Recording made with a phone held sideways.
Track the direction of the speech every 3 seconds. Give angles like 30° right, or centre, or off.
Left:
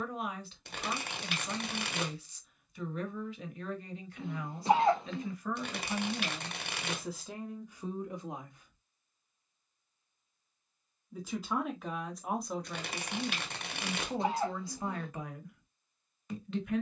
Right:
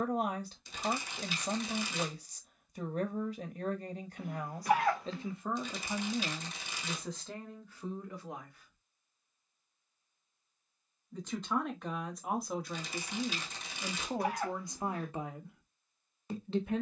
40° right, 30° right, 10° left, centre, 10° right, 30° right.